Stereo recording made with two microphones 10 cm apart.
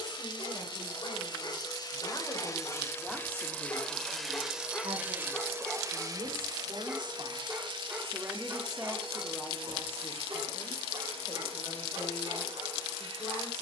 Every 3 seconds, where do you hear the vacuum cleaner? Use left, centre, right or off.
left, centre, right, right, right.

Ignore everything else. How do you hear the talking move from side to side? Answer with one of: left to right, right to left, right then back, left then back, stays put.
right then back.